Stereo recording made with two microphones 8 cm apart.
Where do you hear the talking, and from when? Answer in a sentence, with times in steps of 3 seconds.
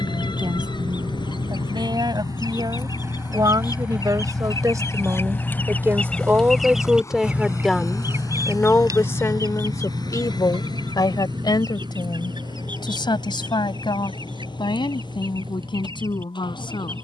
You can hear the talking on the right from 0 s, in the centre from 6 s and on the left from 9 s.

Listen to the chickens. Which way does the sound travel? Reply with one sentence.
You can hear the chickens go from the left side to the right.